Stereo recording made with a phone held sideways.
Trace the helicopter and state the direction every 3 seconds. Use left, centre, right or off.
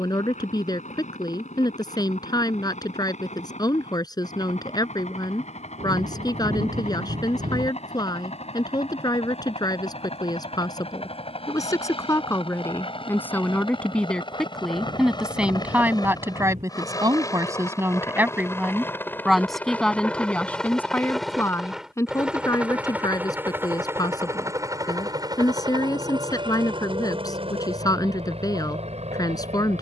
left, left, left, left, left, left, centre, centre, right, right.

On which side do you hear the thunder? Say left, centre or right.
right.